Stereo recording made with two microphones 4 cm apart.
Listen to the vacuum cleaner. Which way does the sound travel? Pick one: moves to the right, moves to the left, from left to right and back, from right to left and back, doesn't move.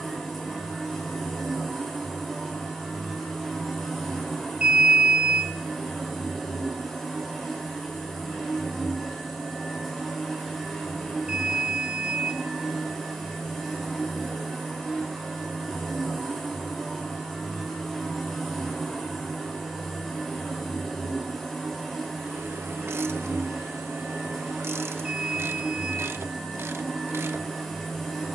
doesn't move.